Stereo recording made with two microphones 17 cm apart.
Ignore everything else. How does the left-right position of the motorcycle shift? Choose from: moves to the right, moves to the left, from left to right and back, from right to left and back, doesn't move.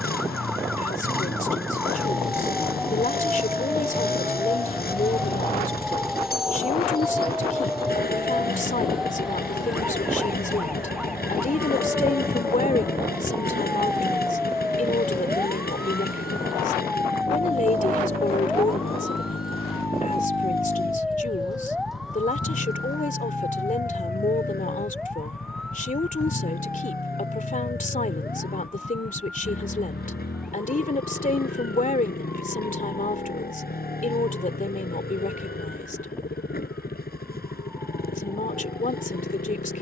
doesn't move.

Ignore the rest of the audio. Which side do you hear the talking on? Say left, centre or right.
left.